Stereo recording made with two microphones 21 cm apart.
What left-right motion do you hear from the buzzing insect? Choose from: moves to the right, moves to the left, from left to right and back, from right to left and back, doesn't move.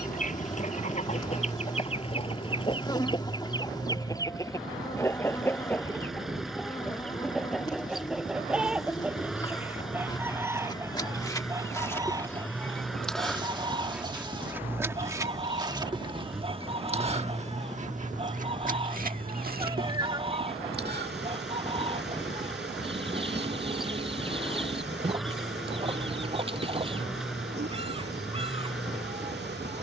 moves to the right.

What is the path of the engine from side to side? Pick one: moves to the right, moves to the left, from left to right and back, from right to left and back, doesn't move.
doesn't move.